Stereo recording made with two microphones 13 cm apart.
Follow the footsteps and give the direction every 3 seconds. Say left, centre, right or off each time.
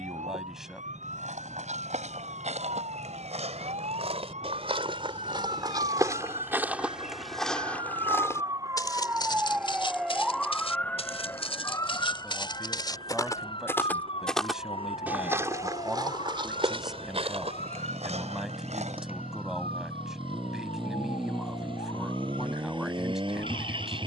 right, right, centre, left, left, right, right, off.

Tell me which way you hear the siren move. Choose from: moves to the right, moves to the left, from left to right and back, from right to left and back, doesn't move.
moves to the left.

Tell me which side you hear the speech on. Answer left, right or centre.
centre.